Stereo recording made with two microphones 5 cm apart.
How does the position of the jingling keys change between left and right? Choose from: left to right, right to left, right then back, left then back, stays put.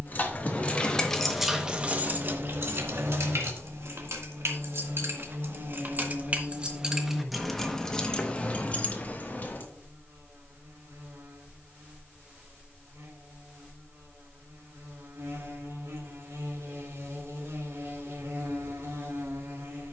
right then back.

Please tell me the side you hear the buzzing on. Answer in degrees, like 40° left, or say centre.
70° right.